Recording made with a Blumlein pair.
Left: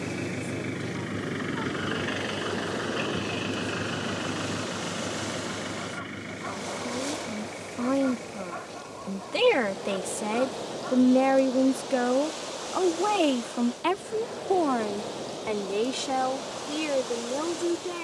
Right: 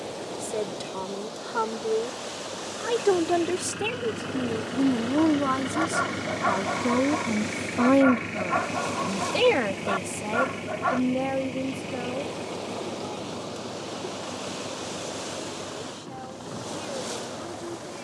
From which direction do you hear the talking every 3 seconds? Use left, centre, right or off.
right, right, right, centre, left, left.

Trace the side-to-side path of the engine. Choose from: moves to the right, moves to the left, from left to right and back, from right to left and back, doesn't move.
moves to the right.